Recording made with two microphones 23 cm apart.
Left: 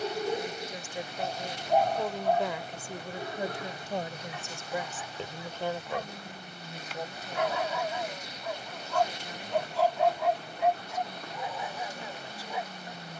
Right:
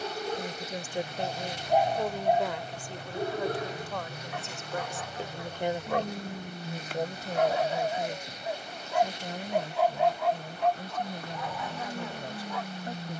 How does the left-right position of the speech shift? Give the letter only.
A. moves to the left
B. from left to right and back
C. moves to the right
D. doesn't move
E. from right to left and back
E.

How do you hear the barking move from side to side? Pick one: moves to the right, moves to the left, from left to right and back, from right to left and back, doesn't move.
from left to right and back.